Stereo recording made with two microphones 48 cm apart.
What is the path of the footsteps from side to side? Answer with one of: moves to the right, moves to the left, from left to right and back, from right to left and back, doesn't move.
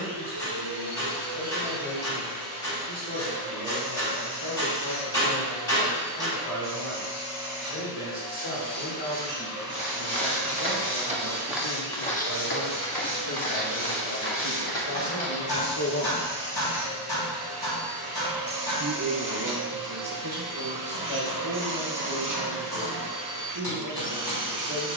moves to the left.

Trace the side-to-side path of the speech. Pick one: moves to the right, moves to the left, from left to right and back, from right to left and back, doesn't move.
moves to the right.